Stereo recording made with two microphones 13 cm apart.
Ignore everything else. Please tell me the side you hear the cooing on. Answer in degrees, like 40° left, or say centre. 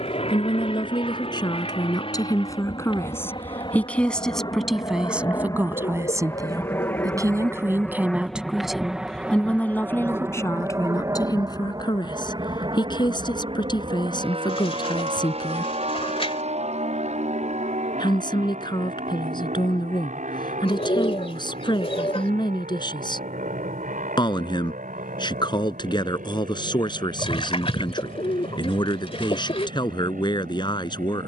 50° left.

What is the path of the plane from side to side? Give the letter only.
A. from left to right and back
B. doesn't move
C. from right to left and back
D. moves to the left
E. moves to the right
E.